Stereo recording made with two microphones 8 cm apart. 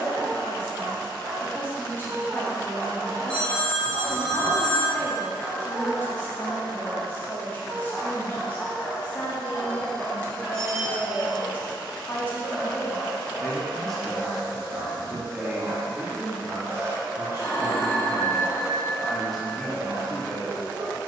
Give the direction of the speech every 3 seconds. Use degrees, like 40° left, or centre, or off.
20° left, 20° left, 20° left, 20° left, 10° left, 20° right, centre.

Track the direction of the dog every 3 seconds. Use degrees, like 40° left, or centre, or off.
50° right, centre, 20° left, 10° left, 20° right, 40° right, 50° right.